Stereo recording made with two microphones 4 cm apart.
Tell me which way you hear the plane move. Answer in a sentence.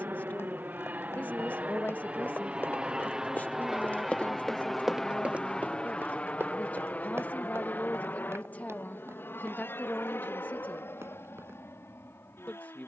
In this clip you hear the plane move to the left.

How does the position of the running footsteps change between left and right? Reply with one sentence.
You can hear the running footsteps go from the left side to the right.